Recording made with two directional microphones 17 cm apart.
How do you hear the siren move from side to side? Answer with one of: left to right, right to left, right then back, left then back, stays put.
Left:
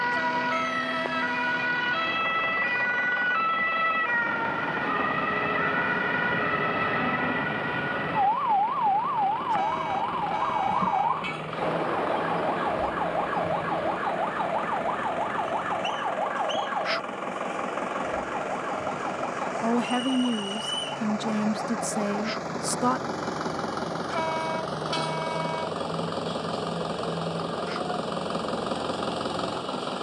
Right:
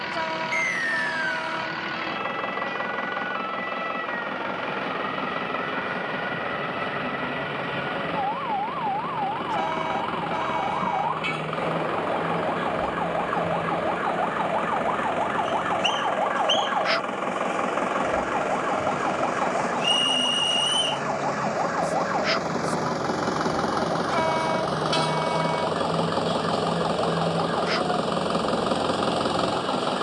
left to right.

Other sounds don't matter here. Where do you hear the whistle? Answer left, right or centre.
right.